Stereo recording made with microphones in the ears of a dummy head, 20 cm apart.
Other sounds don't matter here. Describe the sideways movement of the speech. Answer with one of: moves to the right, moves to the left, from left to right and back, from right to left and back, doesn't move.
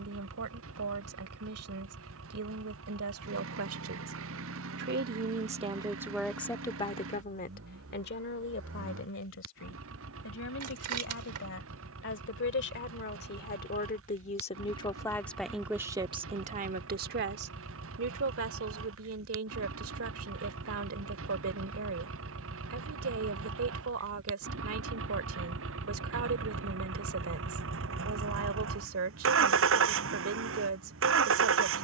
from right to left and back.